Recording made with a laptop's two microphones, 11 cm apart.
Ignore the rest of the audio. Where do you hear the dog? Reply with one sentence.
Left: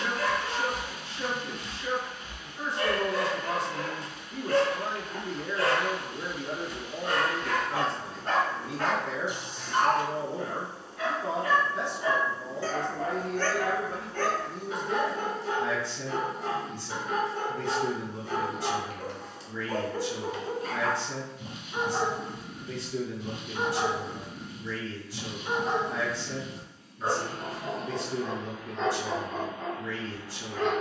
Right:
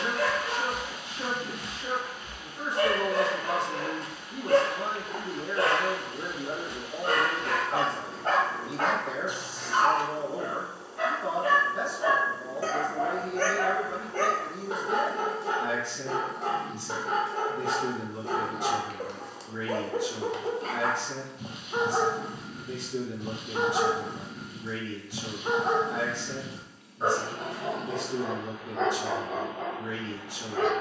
You can hear the dog on the right.